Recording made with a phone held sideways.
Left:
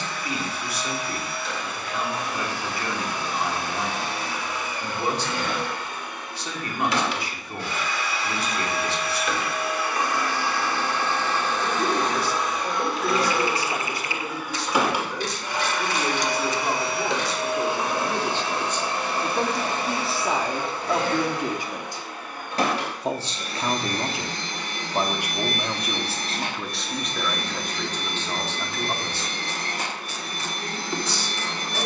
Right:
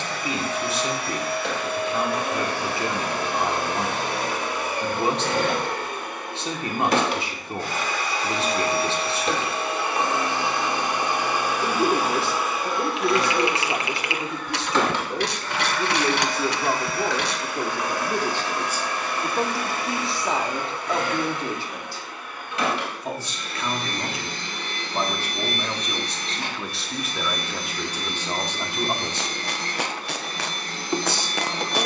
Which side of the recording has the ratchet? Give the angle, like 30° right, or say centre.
70° right.